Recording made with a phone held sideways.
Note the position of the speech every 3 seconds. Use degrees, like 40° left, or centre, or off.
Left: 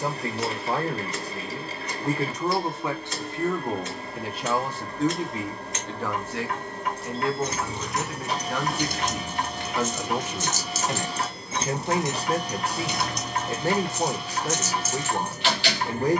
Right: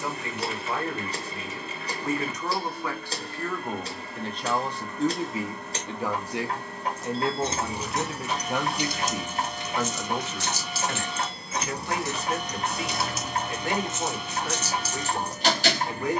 30° left, 10° left, 20° right, 10° left, 30° left, 30° left.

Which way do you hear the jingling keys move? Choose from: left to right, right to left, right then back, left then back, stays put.
left then back.